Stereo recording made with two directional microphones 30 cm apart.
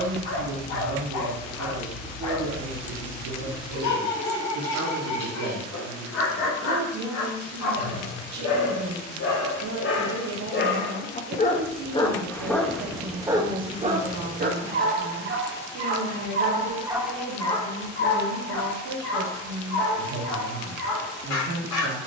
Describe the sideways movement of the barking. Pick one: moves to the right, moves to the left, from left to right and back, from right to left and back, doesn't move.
from left to right and back.